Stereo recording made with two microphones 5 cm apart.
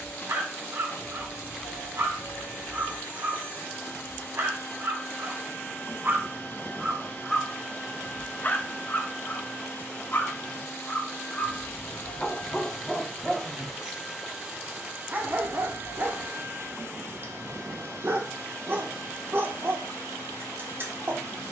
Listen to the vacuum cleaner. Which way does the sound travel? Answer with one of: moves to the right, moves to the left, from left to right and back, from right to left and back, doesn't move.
moves to the right.